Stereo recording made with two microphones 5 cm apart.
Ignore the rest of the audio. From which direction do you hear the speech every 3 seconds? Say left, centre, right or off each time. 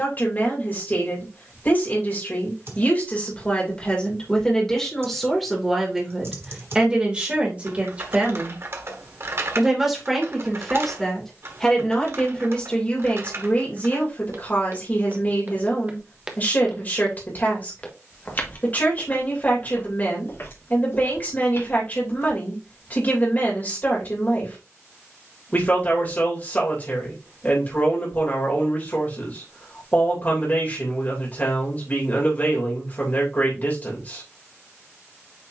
left, centre, right, centre, left, left, left, left, left, left, left, left.